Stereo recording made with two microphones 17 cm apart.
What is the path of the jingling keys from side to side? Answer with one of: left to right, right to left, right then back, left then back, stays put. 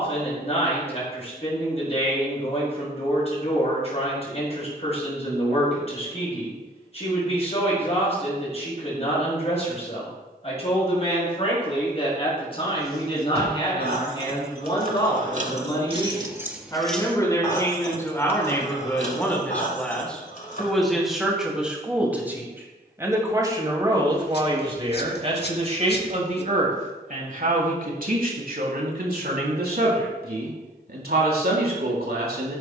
right to left.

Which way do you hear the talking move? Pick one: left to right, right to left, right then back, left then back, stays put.
left to right.